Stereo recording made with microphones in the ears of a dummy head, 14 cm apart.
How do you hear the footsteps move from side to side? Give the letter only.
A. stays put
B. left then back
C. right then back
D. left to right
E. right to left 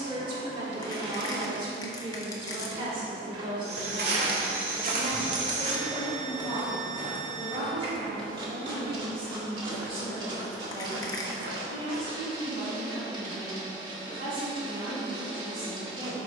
B.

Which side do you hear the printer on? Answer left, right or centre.
right.